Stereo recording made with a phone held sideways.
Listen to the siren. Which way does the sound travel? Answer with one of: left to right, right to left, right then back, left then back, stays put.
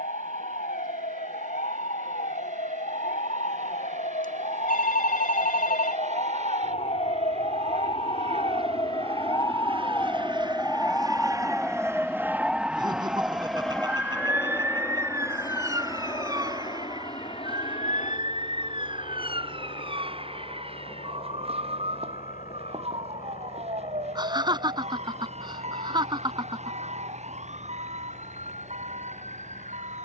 left to right.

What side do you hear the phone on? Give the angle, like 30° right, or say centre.
70° left.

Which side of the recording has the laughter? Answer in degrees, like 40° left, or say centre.
30° right.